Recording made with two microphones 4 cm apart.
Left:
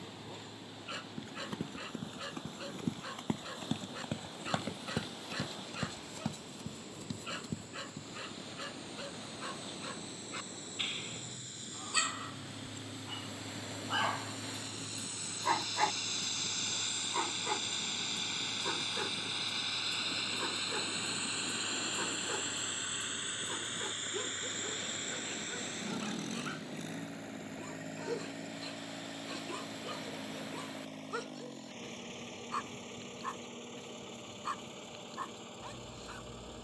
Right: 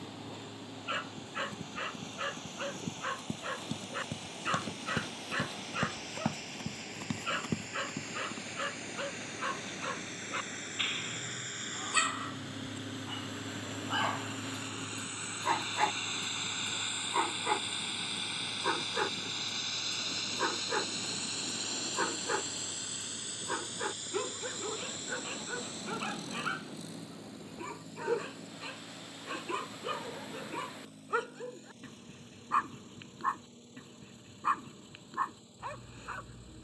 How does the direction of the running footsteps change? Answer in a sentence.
In this clip you hear the running footsteps travel towards the right.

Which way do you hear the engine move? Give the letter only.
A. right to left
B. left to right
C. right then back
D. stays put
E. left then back
A.